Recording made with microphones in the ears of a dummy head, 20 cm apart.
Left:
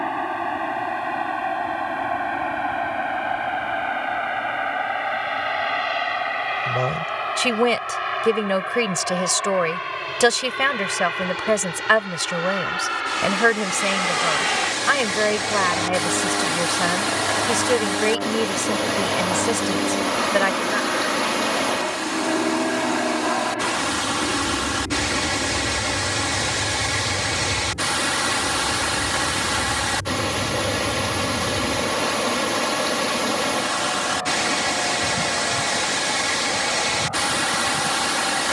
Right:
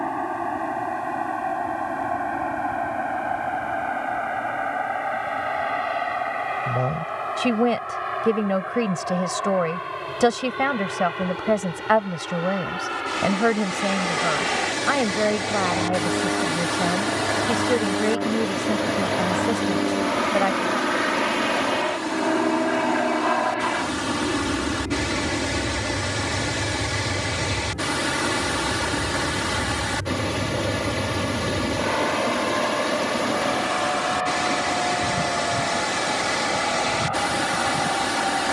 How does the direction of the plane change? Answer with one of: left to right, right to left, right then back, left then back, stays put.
left to right.